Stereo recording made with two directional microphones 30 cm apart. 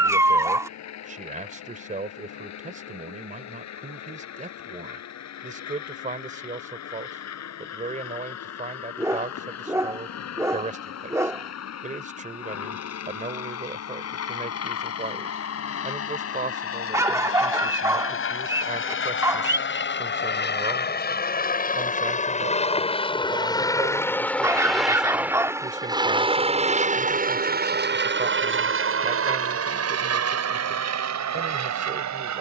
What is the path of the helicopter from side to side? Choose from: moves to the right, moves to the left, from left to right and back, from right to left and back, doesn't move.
moves to the right.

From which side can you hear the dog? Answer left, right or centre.
centre.